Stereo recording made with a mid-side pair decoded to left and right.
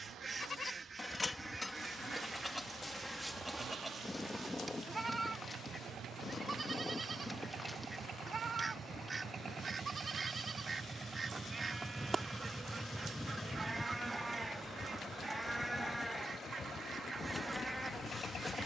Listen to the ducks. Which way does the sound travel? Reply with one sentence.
In this clip you hear the ducks move from right to left and back again.